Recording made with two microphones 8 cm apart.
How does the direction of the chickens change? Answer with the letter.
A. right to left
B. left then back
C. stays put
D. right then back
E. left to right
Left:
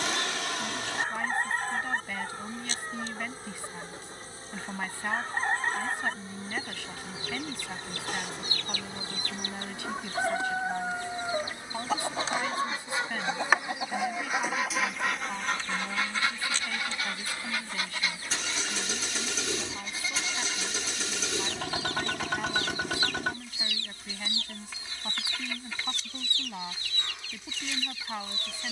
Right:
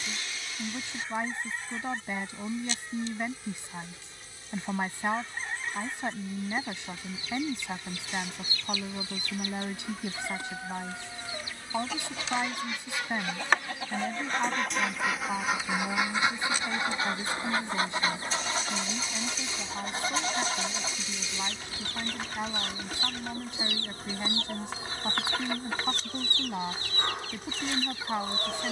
E.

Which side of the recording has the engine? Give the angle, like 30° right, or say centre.
90° left.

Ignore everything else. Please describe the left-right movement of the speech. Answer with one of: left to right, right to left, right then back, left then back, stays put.
stays put.